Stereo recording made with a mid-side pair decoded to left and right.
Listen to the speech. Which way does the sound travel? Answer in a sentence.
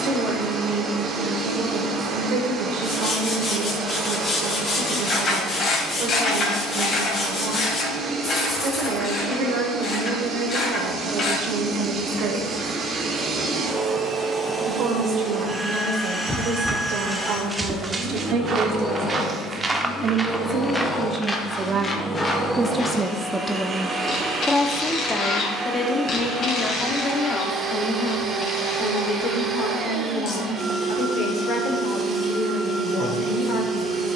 You can hear the speech travel towards the left.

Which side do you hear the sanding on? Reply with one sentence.
You can hear the sanding on the left.